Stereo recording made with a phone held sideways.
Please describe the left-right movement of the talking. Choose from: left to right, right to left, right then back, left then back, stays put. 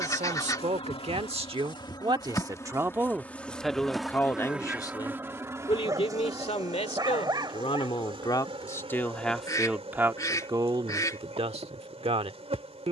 left then back.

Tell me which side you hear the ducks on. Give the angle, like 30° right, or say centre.
20° left.